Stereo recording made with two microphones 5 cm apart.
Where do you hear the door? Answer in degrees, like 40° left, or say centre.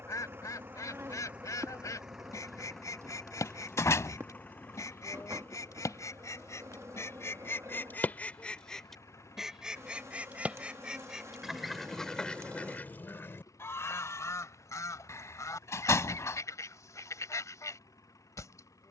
60° left.